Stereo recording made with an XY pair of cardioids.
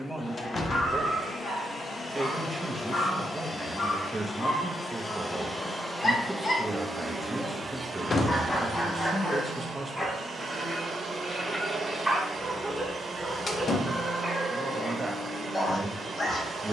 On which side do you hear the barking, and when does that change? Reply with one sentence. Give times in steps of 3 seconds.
In this clip you hear the barking on the left from 0 s, in the centre from 9 s and on the left from 15 s.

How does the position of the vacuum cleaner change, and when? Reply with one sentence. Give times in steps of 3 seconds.
You can hear the vacuum cleaner on the left from 0 s and on the right from 6 s.